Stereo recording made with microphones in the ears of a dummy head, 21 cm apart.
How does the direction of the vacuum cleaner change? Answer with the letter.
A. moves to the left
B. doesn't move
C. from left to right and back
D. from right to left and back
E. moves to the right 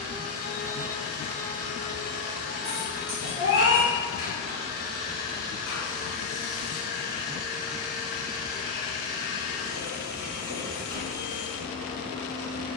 B.